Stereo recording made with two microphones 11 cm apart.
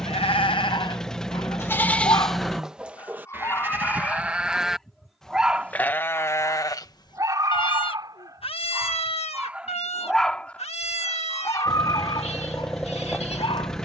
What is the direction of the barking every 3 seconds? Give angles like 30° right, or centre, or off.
40° left, 10° left, 30° right, 10° left, 50° left.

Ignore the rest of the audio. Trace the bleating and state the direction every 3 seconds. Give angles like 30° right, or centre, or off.
20° left, 10° right, 40° left, 80° left, 80° left.